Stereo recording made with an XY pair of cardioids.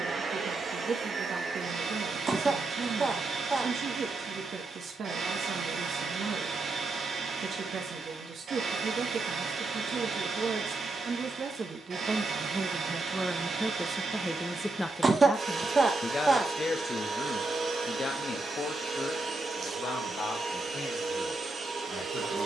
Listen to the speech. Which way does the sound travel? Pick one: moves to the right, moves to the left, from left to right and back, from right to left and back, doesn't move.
moves to the left.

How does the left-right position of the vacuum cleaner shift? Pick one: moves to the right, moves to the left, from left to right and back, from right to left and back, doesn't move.
doesn't move.